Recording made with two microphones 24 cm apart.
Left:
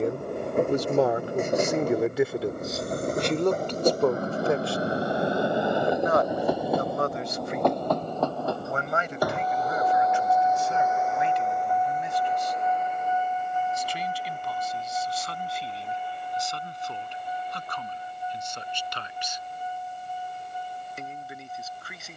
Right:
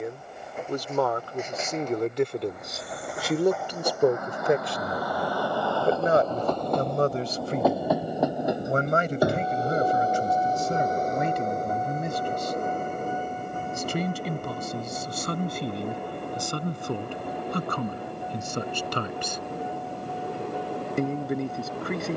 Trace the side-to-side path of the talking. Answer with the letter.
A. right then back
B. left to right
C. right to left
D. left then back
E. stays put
B.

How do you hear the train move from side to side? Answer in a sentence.
In this clip you hear the train move from left to right.